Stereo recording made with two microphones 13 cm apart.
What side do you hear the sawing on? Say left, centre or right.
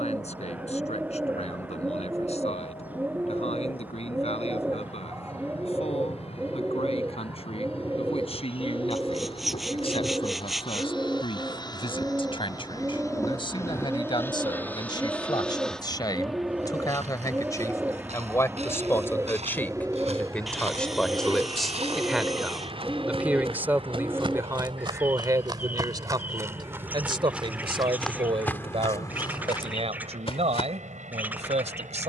centre.